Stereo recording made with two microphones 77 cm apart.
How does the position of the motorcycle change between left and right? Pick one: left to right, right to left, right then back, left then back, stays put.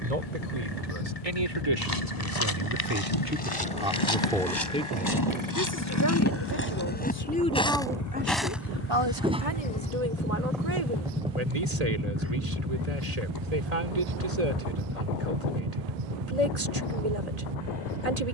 left to right.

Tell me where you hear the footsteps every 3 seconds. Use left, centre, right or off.
left, left, centre, centre, off, off.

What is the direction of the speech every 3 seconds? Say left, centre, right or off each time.
right, centre, centre, right, right, right.